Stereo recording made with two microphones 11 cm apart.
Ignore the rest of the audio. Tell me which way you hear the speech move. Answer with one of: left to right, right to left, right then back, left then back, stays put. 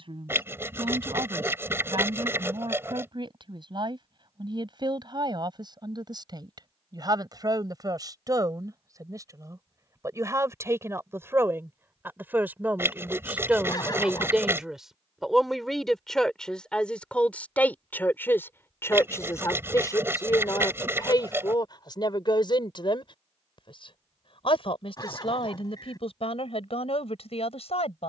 right to left.